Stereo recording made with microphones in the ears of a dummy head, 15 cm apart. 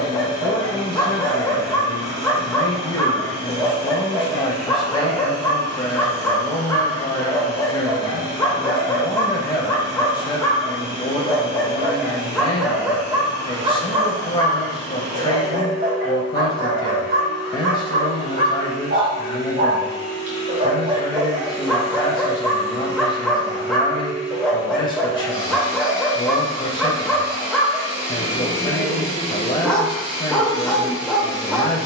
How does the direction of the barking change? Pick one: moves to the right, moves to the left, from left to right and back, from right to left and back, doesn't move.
from left to right and back.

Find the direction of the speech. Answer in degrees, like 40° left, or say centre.
30° left.